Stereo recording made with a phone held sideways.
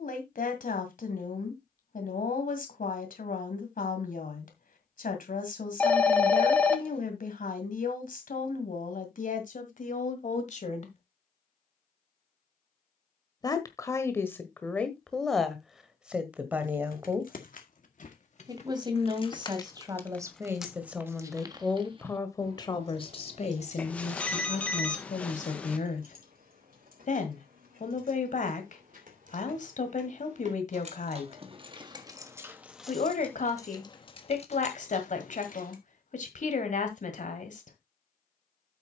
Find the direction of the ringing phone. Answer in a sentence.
In this clip you hear the ringing phone in the centre.